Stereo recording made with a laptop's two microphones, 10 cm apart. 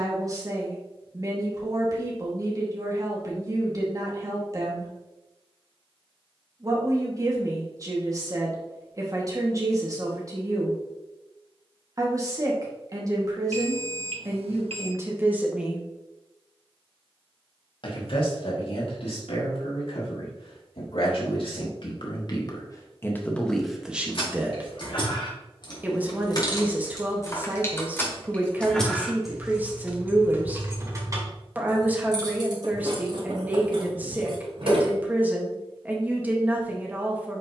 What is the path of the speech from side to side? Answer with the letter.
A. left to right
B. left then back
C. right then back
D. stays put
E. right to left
B.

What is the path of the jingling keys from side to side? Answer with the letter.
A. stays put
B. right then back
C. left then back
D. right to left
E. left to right
E.